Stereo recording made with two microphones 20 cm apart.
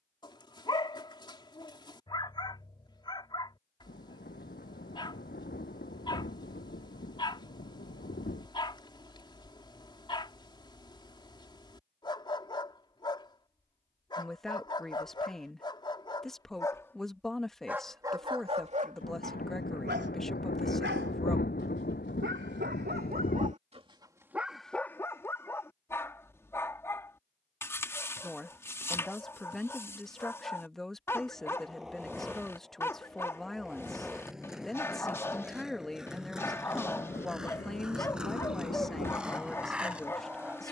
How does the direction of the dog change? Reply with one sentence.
You can hear the dog move from left to right and back again.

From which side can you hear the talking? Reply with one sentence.
In this clip you hear the talking in the centre.